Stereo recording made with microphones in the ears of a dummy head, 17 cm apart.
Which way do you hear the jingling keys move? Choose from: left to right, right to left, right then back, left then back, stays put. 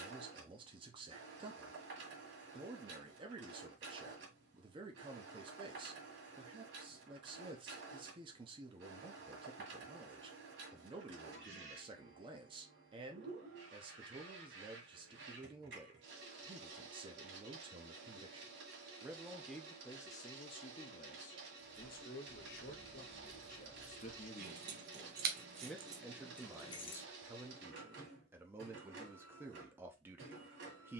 right then back.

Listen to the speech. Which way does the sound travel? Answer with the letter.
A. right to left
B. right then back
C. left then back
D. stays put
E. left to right
C.